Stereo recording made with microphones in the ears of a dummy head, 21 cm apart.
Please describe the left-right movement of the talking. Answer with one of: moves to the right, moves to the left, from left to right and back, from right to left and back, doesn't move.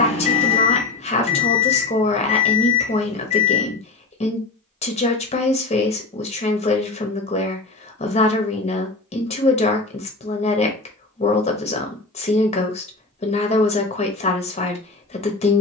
doesn't move.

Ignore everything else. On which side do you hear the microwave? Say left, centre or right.
left.